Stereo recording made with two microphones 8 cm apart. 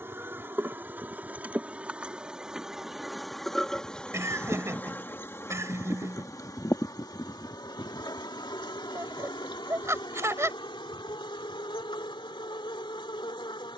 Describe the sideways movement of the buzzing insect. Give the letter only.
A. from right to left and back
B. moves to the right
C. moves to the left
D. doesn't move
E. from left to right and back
C.